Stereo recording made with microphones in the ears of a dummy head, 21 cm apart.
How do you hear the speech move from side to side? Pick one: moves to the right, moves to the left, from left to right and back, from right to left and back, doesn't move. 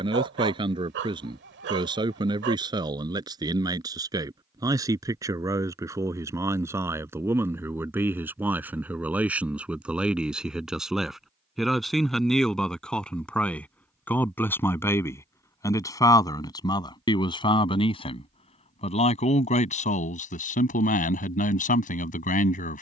moves to the left.